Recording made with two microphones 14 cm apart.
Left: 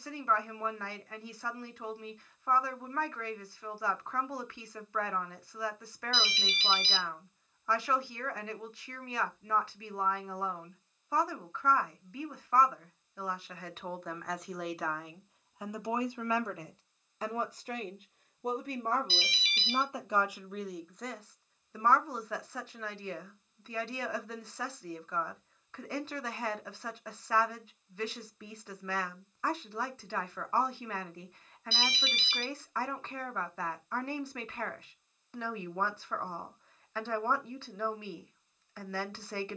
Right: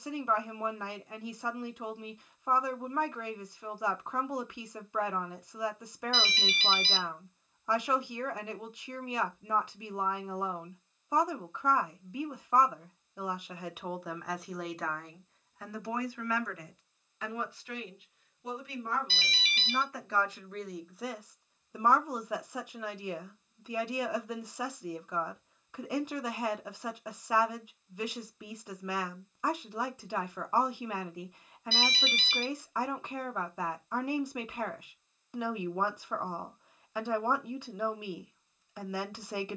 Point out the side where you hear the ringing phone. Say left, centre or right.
right.